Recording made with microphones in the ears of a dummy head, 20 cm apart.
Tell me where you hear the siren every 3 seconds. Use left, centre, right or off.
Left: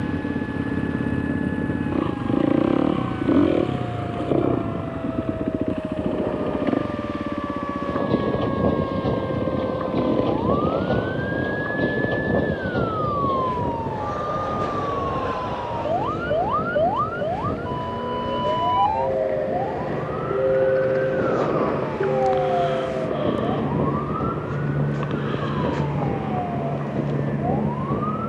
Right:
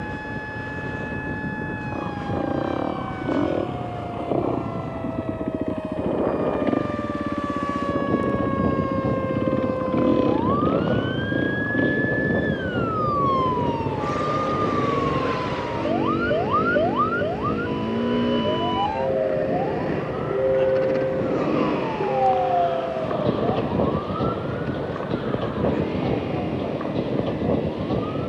right, right, right, right, right, right, centre, left, left, left.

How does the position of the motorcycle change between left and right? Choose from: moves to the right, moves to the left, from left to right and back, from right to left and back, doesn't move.
moves to the right.